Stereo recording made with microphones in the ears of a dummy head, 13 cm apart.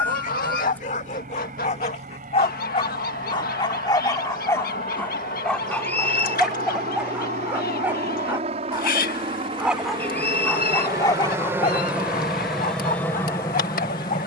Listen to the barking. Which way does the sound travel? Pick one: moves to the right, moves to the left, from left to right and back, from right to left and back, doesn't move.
from left to right and back.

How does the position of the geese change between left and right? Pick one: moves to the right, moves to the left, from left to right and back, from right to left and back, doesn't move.
doesn't move.